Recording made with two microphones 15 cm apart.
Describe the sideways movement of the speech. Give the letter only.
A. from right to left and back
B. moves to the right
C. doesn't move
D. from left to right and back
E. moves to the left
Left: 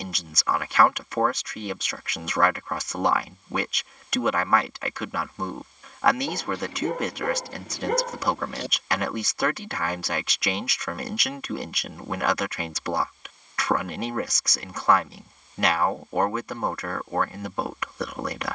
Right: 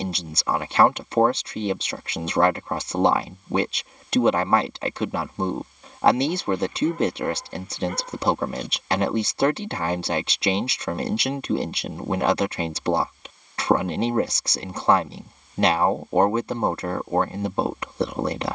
C.